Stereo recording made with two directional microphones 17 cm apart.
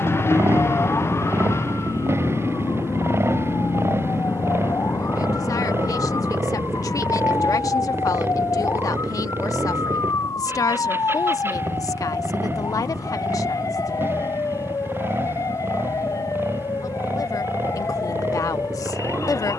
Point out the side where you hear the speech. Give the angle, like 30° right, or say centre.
20° left.